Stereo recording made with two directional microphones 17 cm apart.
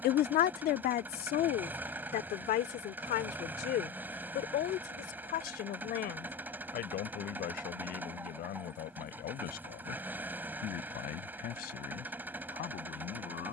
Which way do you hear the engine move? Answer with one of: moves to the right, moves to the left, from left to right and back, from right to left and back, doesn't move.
doesn't move.